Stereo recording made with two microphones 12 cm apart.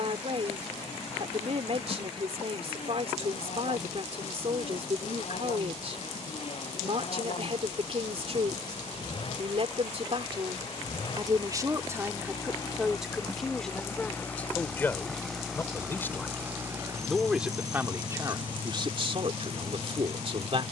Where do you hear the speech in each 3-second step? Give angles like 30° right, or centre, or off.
60° right, 60° right, 60° right, 40° right, centre, centre, 50° right.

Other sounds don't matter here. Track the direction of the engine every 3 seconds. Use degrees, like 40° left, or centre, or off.
70° left, 60° left, 60° left, 40° left, 20° left, 20° right, 50° right.